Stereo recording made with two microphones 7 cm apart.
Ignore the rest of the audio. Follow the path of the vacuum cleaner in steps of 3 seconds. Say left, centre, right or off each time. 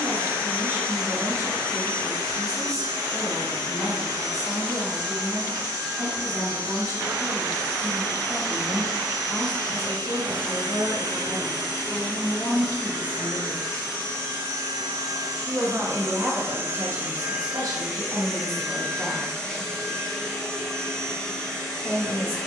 right, right, right, right, right, right, centre, centre.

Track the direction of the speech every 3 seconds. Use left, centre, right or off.
left, left, left, left, left, right, right, left.